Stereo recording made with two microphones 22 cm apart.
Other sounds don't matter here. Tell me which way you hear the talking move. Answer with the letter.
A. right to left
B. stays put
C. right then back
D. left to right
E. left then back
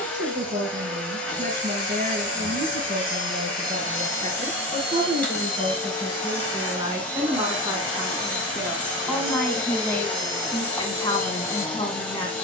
A.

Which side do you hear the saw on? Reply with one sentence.
You can hear the saw on the right.